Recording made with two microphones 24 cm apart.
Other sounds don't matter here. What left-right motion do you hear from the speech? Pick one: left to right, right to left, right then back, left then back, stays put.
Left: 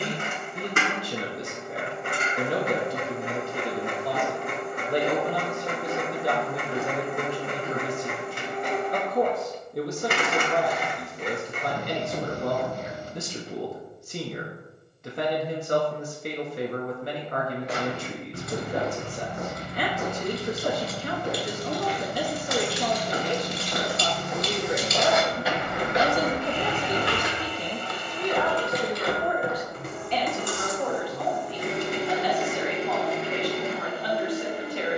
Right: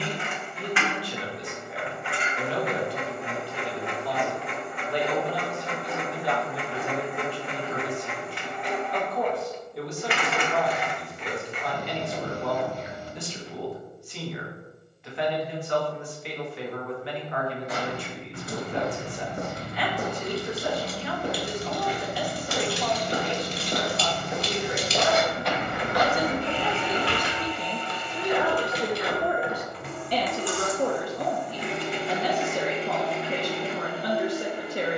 left to right.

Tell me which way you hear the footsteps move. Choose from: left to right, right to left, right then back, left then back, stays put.
right then back.